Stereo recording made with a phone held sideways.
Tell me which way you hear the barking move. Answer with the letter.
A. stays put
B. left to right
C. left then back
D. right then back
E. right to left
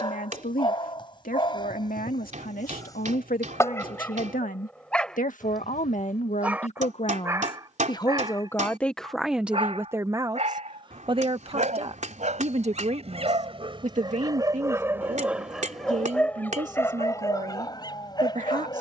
D.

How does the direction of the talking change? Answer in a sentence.
In this clip you hear the talking move from left to right.